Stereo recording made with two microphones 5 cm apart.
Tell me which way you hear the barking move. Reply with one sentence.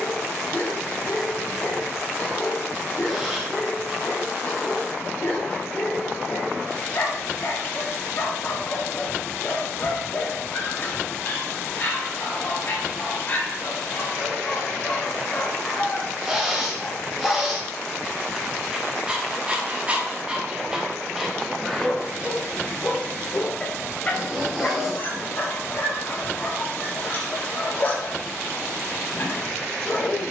In this clip you hear the barking go right and come back.